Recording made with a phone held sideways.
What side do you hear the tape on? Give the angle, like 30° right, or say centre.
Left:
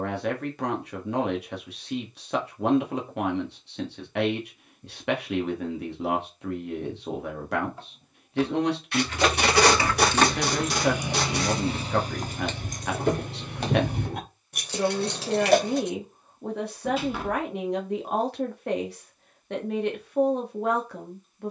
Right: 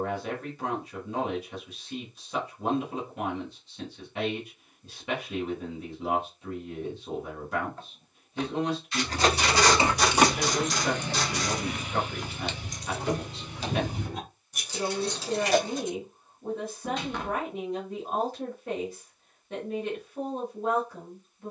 60° left.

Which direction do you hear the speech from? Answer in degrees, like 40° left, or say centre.
70° left.